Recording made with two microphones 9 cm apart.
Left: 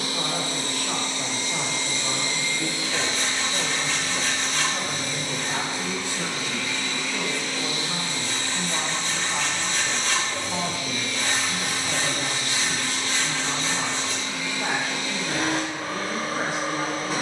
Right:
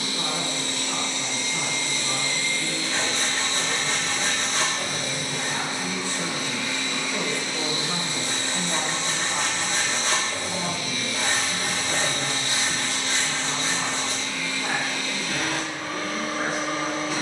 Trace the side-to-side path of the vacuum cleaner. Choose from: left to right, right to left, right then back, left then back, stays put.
right then back.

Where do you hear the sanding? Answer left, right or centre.
right.